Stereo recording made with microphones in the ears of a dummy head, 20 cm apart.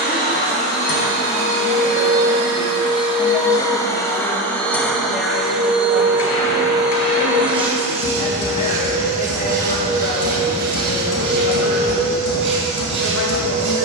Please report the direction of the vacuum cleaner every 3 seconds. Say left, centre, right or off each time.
left, centre, right, right, right.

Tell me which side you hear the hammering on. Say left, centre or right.
left.